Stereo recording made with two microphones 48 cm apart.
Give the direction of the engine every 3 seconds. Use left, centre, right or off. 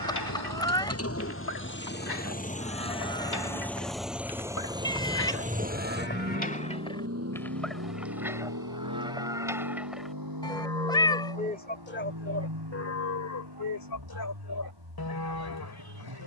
left, centre, right, right, right, right.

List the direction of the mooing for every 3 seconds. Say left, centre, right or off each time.
left, left, centre, centre, left, left.